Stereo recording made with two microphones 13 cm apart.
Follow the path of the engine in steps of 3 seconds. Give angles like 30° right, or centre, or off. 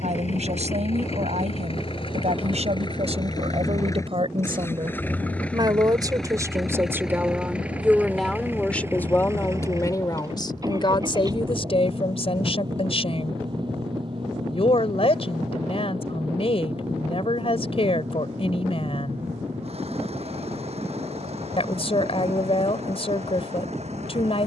50° left, 20° left, 10° right, 30° right, 40° right, 40° right, 50° right, 50° right.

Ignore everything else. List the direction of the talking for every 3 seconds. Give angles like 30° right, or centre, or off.
60° right, 40° right, 10° right, 30° left, 50° left, 50° left, 50° left, 50° left.